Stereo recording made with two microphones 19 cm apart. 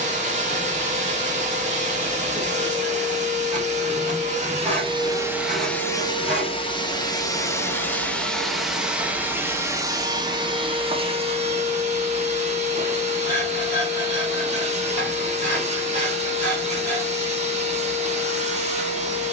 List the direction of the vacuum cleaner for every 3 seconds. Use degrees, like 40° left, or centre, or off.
40° right, 20° right, 10° left, 20° right, 40° right, 40° right, 40° right.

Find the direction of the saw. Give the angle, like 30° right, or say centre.
40° right.